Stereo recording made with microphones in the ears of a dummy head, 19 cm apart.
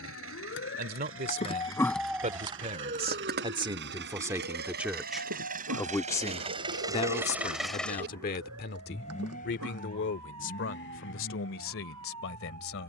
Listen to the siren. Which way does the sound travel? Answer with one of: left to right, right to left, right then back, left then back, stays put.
left to right.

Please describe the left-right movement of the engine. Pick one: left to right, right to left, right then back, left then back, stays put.
right to left.